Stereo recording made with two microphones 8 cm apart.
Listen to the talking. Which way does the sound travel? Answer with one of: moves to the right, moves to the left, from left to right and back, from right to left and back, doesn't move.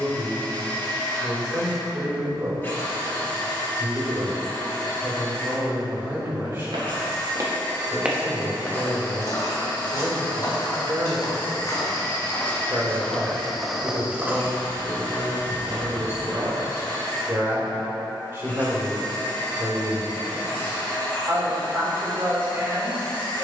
doesn't move.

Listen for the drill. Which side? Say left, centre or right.
left.